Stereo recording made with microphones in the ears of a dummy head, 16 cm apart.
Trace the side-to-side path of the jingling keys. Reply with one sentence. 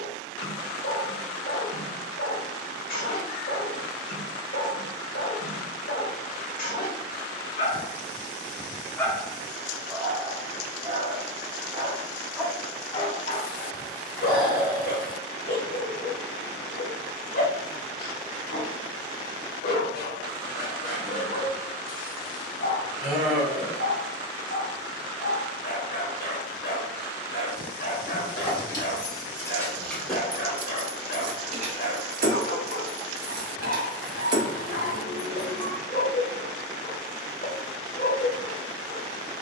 You can hear the jingling keys go right and come back.